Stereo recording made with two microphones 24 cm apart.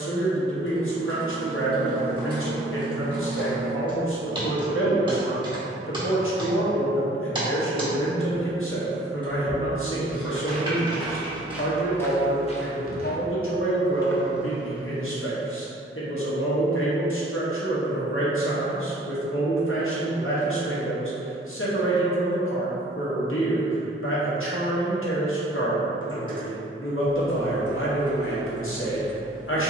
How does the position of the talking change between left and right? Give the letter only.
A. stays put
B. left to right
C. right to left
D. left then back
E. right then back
A.